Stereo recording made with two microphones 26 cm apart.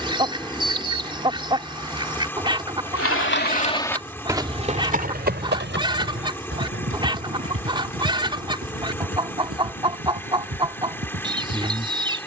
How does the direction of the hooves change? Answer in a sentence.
You can hear the hooves move to the right.